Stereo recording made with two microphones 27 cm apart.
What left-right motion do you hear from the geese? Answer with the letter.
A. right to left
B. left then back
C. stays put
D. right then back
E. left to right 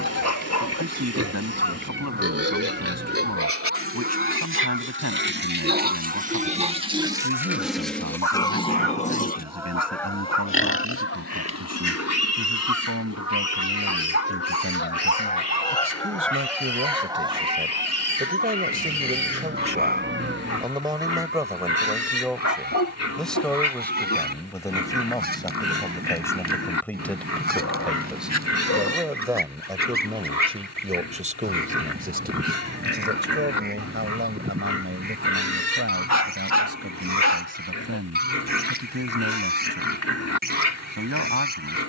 B.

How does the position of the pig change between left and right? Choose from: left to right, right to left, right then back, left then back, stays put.
right to left.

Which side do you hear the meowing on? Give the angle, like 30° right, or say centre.
40° right.